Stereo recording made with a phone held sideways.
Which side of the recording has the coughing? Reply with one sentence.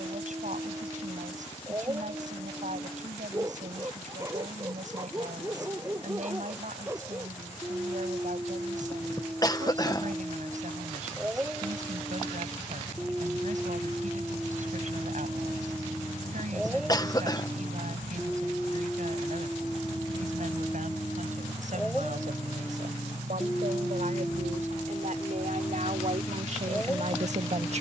In this clip you hear the coughing on the left.